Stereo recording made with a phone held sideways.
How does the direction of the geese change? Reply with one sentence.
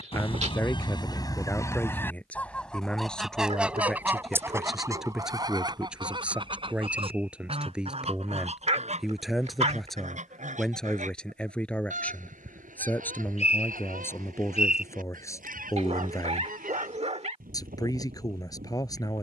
You can hear the geese move from left to right.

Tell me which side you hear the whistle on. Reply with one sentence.
In this clip you hear the whistle on the left.